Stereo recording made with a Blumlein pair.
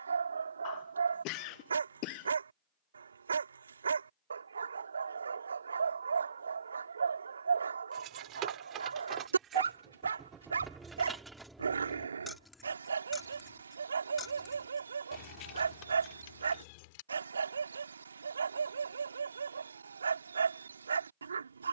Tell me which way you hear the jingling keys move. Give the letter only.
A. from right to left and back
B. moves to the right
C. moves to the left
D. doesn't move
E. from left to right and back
C.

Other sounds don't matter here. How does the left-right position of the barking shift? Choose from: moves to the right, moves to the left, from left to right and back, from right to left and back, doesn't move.
doesn't move.